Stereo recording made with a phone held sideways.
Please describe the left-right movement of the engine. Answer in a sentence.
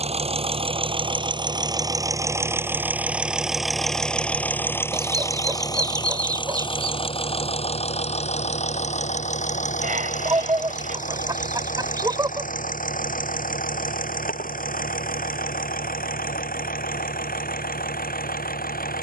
In this clip you hear the engine travel towards the left.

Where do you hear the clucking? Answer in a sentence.
In this clip you hear the clucking on the right.